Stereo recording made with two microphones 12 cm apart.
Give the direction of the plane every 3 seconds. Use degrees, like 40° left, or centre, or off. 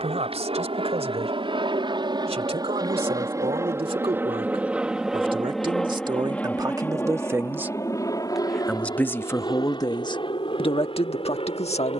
50° right, 10° right, 20° left, 40° left.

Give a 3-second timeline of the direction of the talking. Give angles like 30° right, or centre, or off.
60° right, 50° right, 20° right, 40° left.